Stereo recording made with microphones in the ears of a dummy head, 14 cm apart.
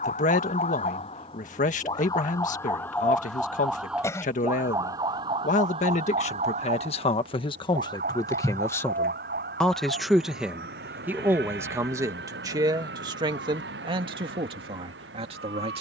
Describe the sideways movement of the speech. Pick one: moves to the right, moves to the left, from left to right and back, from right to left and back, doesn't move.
moves to the right.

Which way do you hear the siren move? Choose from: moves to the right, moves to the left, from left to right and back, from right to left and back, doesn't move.
moves to the right.